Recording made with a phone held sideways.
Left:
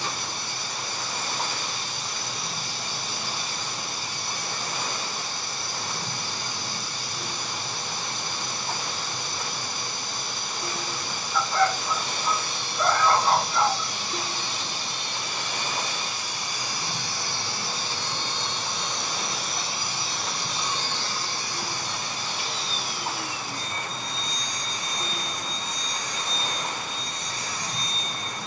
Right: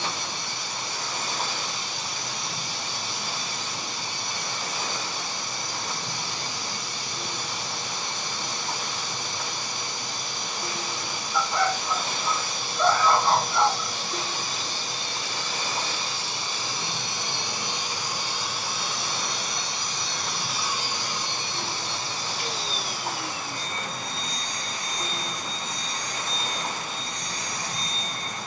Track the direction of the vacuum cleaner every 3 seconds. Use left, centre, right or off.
right, right, right, right, right, right, centre, right, right, right.